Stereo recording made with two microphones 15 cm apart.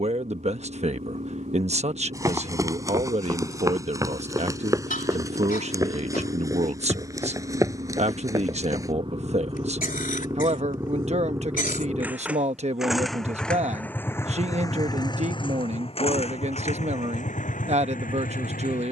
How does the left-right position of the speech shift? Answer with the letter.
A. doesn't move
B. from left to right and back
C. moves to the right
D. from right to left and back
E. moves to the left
A.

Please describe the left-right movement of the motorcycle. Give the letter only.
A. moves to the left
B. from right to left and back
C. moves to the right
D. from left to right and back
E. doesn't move
A.